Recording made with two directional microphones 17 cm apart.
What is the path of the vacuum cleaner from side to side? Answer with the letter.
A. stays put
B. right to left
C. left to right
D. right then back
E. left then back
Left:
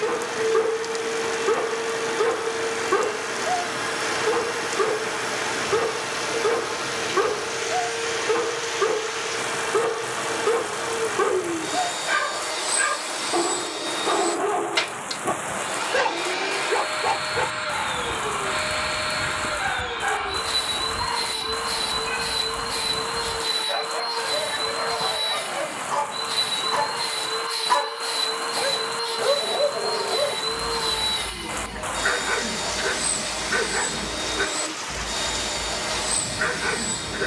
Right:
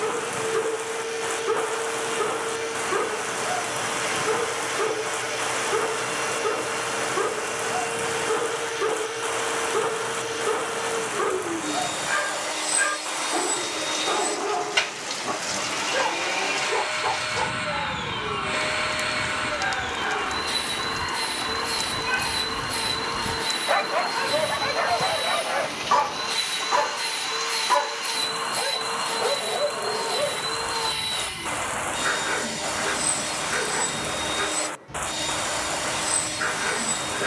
A.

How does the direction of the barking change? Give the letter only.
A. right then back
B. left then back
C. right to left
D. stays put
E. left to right
A.